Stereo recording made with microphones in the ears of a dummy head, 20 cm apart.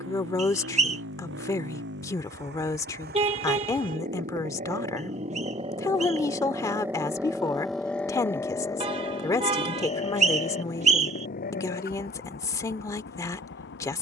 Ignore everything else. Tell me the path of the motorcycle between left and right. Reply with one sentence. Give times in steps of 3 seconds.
You can hear the motorcycle on the right from 0 s, in the centre from 6 s and on the left from 9 s.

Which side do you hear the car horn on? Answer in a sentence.
In this clip you hear the car horn on the right.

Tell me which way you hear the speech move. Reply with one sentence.
In this clip you hear the speech stay put.